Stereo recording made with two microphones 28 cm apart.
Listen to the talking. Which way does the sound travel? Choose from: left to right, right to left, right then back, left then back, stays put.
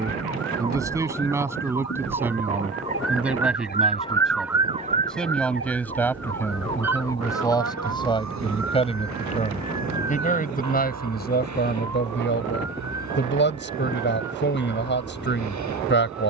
right to left.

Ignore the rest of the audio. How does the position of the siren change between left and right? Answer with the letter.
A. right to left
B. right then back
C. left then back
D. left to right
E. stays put
D.